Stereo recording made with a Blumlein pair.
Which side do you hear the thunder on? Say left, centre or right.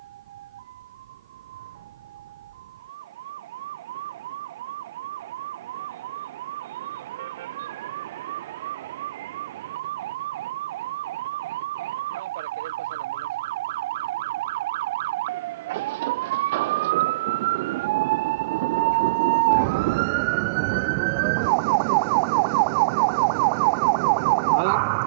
right.